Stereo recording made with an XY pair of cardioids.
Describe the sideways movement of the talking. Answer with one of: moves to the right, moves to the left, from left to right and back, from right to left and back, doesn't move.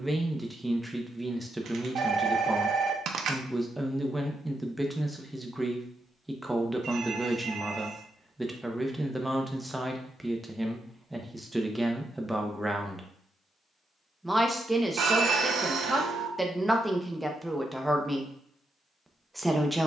doesn't move.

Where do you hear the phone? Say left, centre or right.
right.